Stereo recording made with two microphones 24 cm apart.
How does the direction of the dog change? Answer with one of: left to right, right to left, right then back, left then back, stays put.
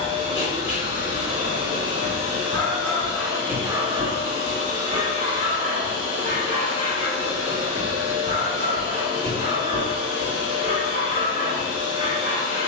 right then back.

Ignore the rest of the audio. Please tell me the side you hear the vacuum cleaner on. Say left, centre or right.
right.